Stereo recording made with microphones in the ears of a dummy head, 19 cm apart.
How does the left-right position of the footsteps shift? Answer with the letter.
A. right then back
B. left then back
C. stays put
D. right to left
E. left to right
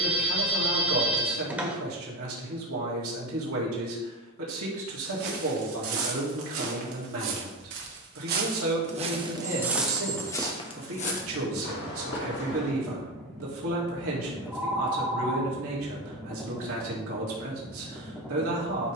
D.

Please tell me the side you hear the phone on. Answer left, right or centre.
centre.